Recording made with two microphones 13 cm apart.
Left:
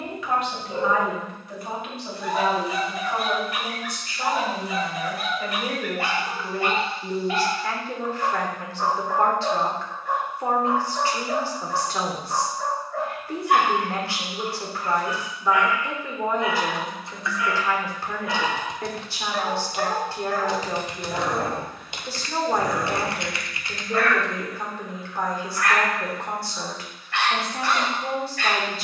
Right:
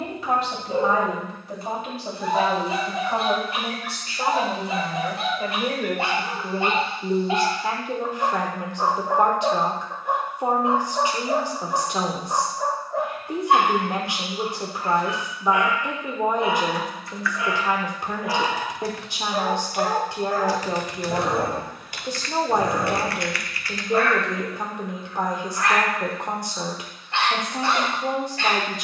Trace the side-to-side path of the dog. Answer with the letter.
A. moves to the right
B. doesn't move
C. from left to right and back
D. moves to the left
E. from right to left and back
B.